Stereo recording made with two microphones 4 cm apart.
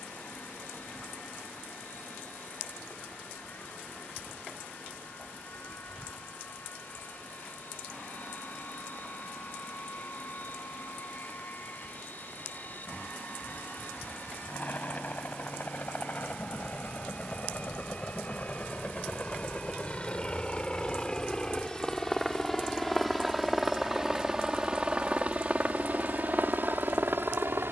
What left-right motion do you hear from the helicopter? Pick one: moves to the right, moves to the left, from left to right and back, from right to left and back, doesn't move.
moves to the right.